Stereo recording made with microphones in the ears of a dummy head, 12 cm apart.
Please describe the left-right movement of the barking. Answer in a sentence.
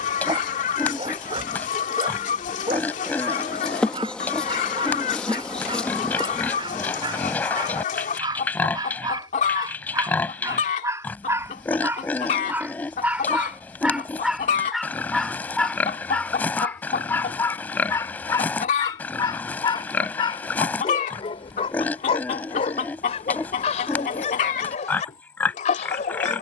In this clip you hear the barking travel towards the left.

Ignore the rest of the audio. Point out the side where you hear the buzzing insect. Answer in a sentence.
In this clip you hear the buzzing insect in the centre.